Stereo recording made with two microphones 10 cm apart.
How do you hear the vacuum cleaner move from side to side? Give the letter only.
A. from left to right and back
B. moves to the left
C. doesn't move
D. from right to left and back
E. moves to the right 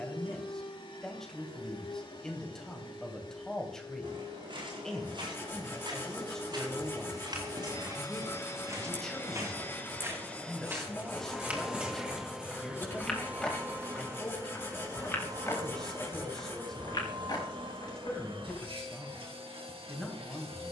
E.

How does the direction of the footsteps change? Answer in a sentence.
You can hear the footsteps move to the left.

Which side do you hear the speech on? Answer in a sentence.
In this clip you hear the speech in the centre.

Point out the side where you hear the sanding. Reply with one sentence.
You can hear the sanding on the left.